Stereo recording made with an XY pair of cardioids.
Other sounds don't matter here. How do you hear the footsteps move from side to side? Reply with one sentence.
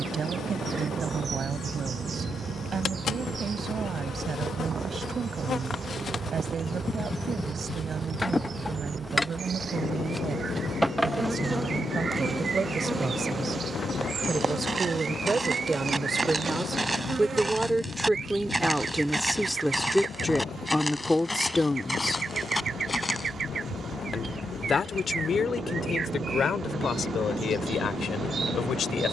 You can hear the footsteps travel towards the left.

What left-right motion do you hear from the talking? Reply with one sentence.
You can hear the talking go from the right side to the left.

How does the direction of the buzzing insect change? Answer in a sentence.
In this clip you hear the buzzing insect move to the right.